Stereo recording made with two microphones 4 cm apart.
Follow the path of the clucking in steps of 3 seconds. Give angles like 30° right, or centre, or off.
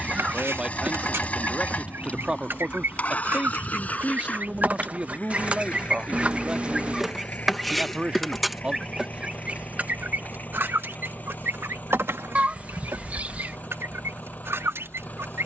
70° right, 40° right, centre, 50° right, 80° right.